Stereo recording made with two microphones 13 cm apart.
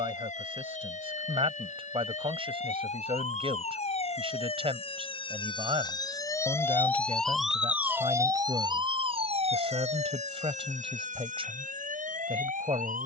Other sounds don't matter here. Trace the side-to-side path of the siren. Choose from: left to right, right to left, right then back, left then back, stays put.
left to right.